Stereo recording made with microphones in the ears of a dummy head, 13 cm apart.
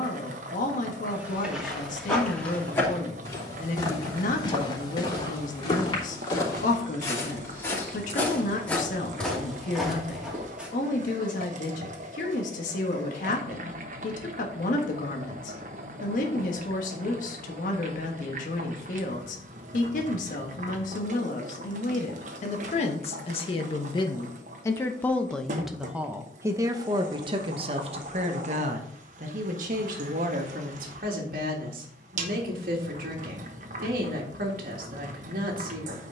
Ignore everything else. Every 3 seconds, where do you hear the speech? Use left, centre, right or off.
left, left, left, left, left, left, left, left, centre, right, right, right.